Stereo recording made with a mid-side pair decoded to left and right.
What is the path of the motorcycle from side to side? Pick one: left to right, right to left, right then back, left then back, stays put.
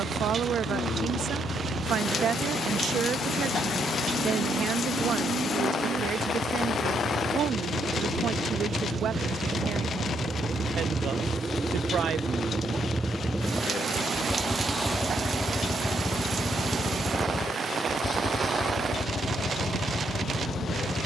right to left.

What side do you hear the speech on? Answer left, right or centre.
right.